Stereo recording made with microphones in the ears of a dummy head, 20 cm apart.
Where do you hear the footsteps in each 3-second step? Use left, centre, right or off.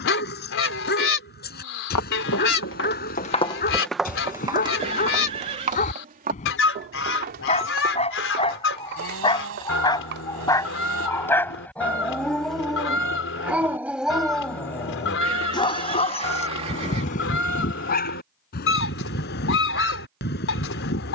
left, centre, right, right, off, off, off.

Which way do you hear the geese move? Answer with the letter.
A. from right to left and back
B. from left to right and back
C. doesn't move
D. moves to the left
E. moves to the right
C.